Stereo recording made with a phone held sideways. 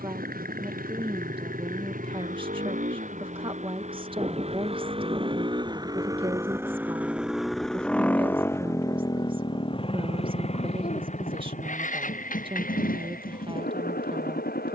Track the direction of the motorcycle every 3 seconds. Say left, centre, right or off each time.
right, right, centre, left, left.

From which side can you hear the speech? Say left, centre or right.
right.